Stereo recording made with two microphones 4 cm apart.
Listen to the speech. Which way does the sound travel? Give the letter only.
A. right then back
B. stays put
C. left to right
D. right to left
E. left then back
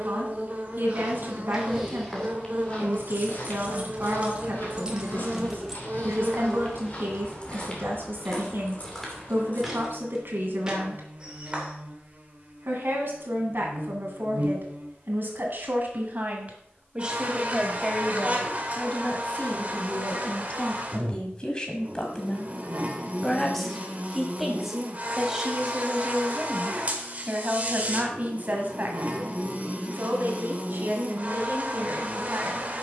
E.